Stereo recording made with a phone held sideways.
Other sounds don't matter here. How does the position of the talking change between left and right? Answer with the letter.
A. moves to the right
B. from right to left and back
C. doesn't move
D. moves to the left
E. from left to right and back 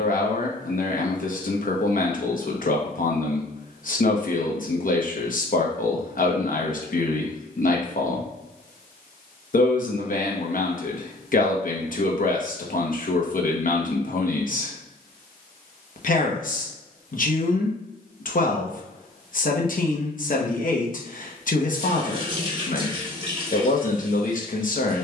C.